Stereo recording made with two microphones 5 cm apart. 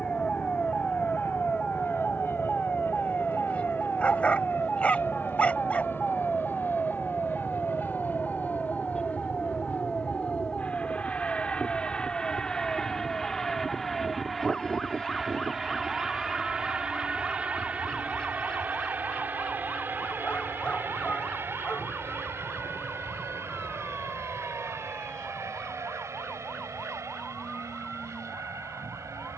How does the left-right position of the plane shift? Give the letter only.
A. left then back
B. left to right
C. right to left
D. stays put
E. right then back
B.